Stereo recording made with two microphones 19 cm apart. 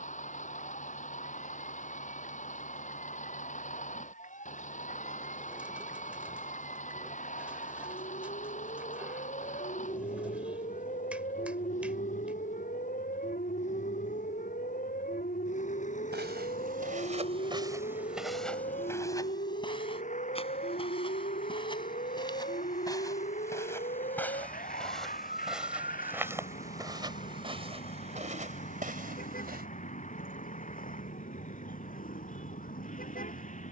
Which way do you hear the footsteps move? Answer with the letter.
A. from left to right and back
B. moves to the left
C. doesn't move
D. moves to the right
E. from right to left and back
E.